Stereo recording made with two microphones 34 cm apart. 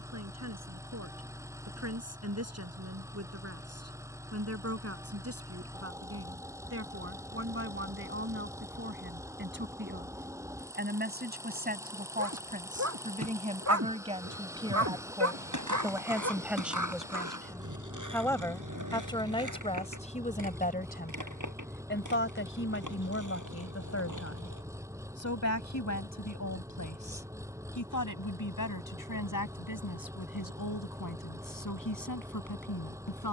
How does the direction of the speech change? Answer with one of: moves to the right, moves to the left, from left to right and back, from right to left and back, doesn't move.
moves to the left.